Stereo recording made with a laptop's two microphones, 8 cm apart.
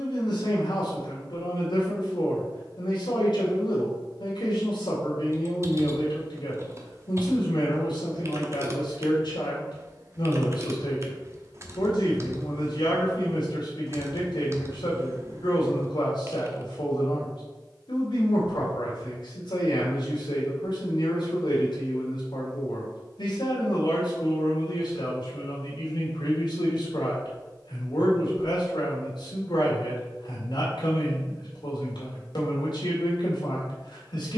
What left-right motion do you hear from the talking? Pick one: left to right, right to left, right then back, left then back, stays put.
stays put.